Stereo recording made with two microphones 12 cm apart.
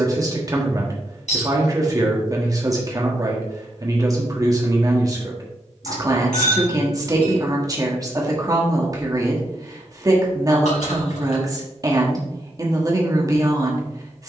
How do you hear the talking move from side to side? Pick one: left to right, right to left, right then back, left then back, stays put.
stays put.